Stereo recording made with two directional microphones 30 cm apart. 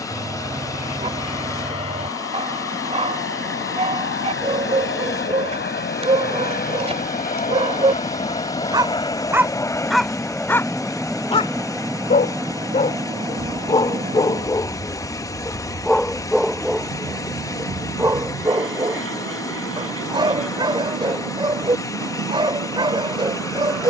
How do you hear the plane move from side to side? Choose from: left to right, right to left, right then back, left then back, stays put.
left to right.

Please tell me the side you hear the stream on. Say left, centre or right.
centre.